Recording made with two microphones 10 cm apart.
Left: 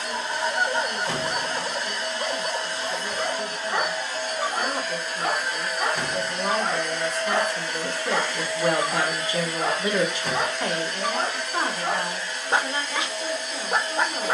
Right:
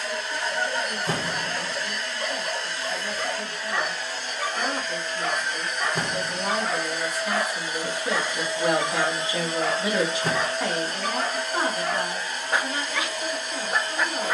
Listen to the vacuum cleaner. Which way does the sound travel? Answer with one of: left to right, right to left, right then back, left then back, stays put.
left to right.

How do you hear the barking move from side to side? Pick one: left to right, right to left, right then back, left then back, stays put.
stays put.